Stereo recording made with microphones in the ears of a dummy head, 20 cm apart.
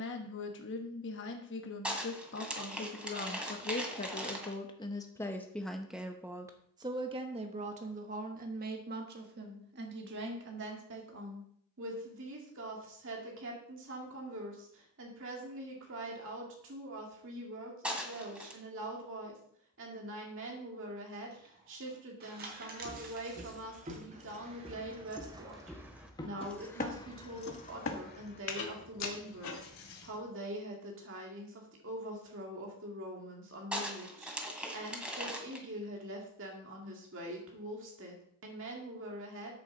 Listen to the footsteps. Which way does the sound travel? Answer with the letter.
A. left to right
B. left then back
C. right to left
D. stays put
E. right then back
C.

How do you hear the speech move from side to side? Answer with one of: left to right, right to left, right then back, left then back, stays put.
left to right.